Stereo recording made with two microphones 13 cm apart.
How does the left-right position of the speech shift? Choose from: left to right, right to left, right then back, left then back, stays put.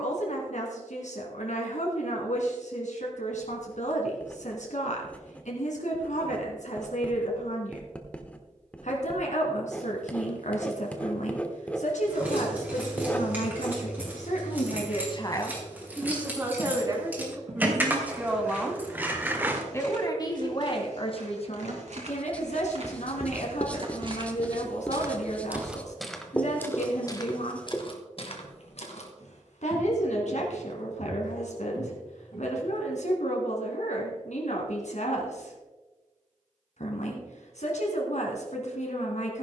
right then back.